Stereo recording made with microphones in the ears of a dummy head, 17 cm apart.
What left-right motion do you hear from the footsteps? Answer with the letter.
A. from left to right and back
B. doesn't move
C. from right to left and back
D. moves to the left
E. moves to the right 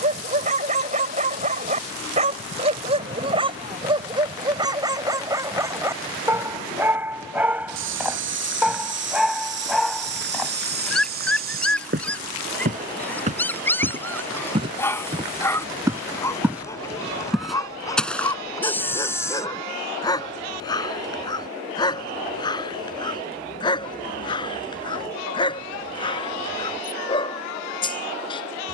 D.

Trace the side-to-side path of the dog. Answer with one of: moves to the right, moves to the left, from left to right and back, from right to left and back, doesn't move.
moves to the left.